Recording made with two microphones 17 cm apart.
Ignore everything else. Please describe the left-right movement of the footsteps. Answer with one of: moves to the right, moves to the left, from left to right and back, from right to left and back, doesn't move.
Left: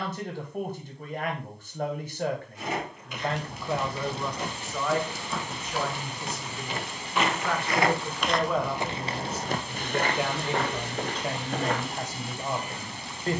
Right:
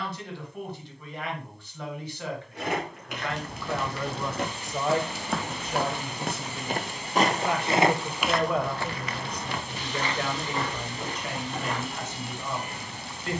moves to the left.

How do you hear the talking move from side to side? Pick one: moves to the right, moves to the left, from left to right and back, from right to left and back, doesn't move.
from left to right and back.